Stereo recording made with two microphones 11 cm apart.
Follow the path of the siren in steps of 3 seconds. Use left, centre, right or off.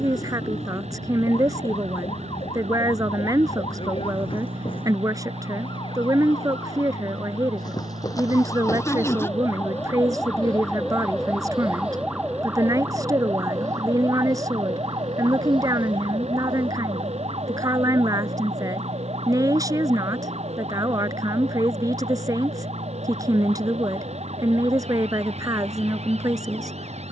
left, left, left, centre, right, right, right, right, right.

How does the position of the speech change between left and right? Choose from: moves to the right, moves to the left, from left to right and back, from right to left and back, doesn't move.
doesn't move.